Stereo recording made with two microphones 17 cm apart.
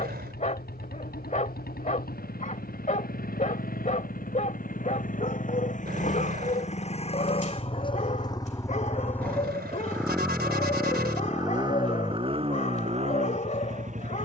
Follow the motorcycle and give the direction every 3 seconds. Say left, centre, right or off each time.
left, left, left, centre, right.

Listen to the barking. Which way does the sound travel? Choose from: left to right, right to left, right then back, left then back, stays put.
stays put.